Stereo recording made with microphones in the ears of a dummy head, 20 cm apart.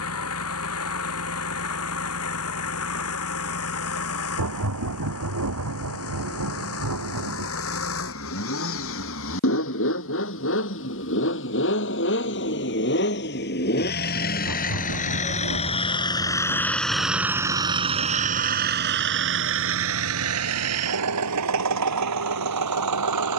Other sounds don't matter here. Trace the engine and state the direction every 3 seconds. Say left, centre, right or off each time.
left, left, left, left, left, centre, right, right.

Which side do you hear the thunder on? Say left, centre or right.
right.